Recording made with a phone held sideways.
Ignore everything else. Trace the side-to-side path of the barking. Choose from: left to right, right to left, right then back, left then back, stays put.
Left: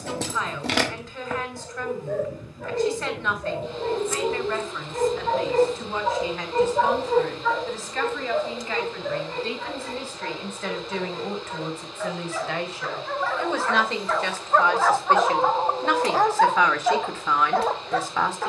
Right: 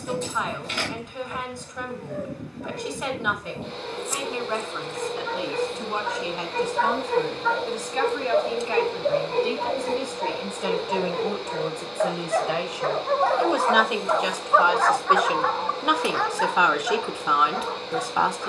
right then back.